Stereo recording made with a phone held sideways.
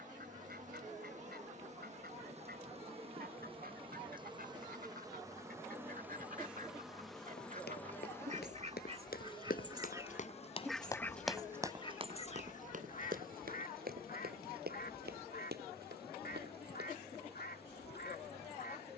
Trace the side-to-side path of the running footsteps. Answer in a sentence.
You can hear the running footsteps travel towards the right.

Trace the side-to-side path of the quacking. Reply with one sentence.
You can hear the quacking move to the left.